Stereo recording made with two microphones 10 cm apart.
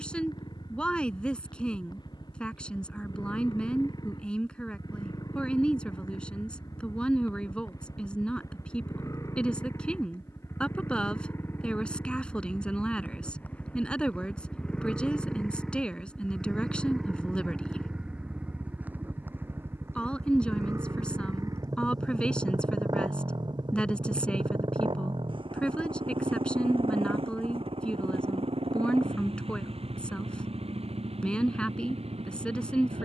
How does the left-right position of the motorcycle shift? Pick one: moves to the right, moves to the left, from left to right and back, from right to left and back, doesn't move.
moves to the right.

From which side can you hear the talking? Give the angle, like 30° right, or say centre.
10° left.